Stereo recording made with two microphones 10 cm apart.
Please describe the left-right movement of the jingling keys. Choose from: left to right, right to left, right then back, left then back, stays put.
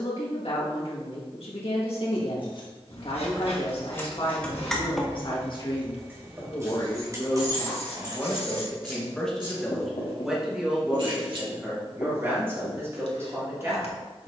left to right.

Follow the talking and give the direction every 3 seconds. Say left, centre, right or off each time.
left, left, left, centre, right.